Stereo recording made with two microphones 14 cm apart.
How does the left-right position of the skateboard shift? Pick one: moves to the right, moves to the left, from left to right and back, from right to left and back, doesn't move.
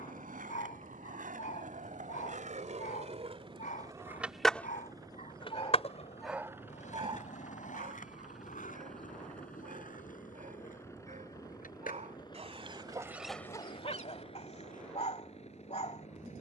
moves to the left.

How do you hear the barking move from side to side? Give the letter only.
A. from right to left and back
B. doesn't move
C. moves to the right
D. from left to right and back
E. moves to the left
D.